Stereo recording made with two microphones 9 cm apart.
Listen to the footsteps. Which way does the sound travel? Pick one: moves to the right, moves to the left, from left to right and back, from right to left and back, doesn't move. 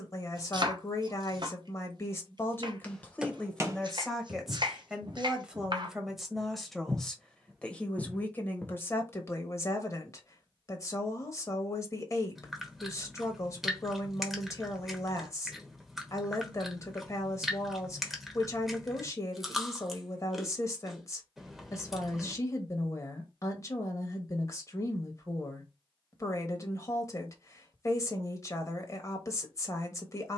from left to right and back.